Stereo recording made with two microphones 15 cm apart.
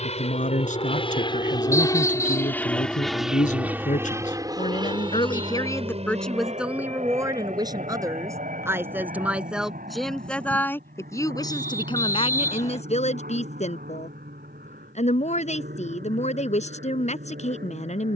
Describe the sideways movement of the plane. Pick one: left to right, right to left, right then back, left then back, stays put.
left to right.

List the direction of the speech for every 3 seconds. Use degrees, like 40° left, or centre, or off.
60° left, 50° left, 20° right, 10° left, 50° left, 50° left.